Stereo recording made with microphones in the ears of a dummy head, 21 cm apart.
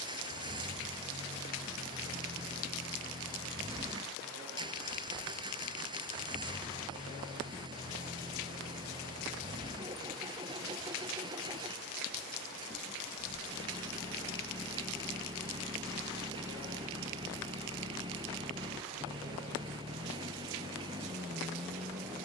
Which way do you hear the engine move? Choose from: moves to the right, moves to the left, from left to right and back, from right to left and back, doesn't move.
doesn't move.